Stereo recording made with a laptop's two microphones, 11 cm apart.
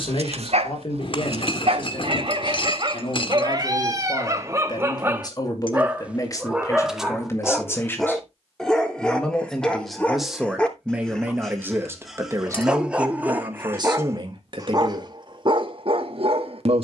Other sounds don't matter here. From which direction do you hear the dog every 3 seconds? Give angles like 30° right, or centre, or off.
60° right, 30° right, centre, 10° left, 20° right, 50° right.